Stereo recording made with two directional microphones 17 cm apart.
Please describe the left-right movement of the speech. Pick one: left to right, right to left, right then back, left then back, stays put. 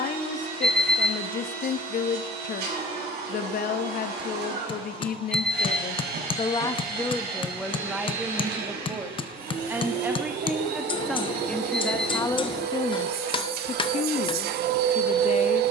right then back.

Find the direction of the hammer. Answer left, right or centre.
left.